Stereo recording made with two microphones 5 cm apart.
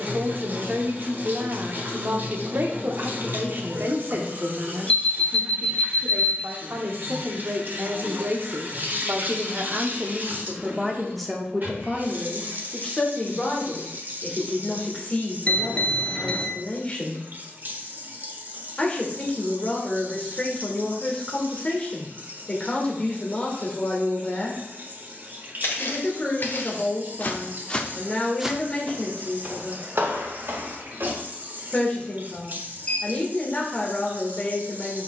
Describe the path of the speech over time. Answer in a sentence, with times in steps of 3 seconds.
You can hear the speech on the right from 0 s, in the centre from 9 s and on the left from 12 s.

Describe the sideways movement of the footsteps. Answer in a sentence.
In this clip you hear the footsteps travel towards the right.